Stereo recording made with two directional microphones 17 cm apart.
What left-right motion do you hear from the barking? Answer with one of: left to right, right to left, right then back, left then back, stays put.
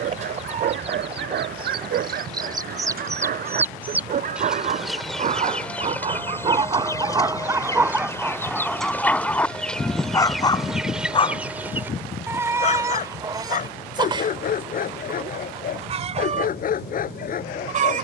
right to left.